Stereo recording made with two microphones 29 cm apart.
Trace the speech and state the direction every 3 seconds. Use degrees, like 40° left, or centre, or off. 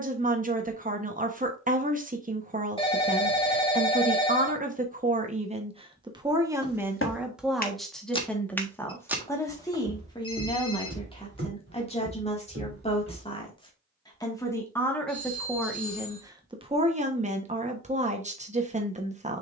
30° right, 30° right, centre, 10° left, 20° left, 10° right, 20° right.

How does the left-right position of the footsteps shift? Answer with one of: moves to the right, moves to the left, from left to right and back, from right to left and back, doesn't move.
moves to the right.